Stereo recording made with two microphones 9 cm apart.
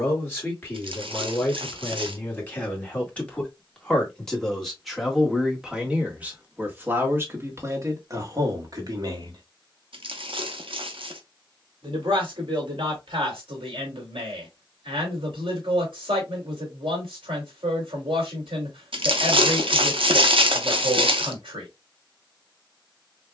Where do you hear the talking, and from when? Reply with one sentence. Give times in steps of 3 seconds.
In this clip you hear the talking on the left from 0 s, in the centre from 3 s and on the right from 6 s.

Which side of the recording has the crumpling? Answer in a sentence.
You can hear the crumpling on the right.